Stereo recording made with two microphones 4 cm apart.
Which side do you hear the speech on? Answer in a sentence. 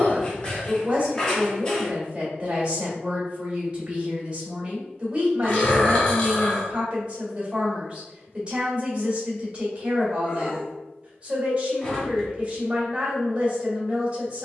In this clip you hear the speech on the right.